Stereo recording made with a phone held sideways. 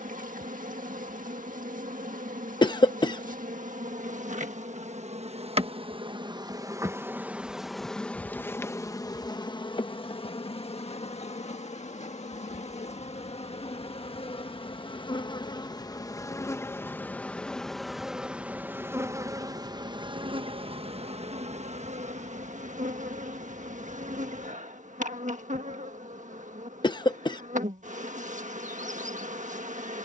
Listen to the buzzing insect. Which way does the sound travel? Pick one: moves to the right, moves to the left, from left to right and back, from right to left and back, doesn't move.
from right to left and back.